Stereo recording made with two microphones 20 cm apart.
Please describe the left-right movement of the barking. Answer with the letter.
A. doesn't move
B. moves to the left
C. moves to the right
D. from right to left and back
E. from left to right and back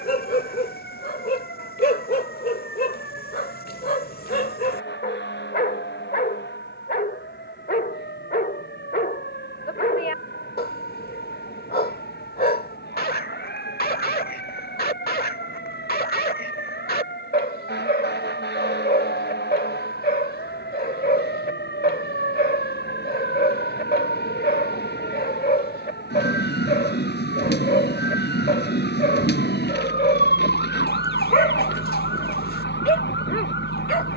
A.